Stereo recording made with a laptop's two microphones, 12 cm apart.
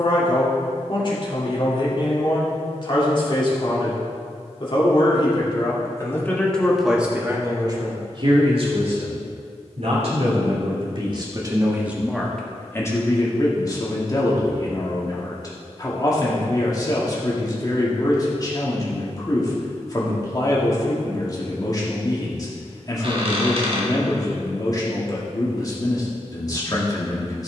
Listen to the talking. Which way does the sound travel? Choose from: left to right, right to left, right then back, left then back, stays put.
right then back.